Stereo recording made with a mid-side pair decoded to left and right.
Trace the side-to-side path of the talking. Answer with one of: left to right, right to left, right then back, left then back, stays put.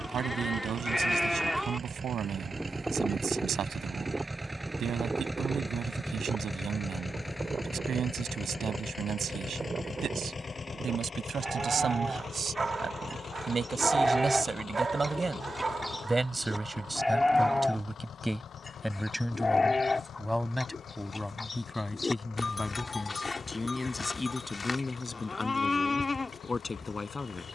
right to left.